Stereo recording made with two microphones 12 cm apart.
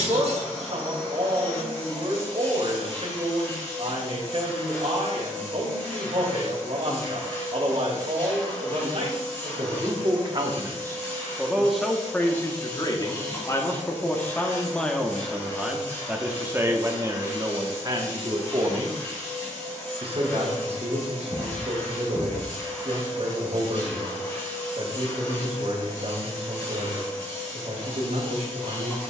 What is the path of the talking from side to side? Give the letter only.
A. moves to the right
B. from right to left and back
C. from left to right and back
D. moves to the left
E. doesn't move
B.